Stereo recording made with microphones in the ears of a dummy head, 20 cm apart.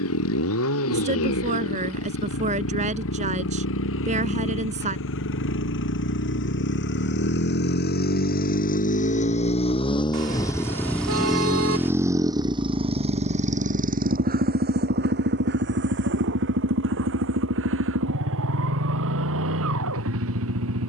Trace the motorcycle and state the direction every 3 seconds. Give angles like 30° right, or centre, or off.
70° left, 70° left, 50° left, 10° left, 30° right, 60° right, 70° right.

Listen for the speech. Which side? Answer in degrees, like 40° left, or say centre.
30° right.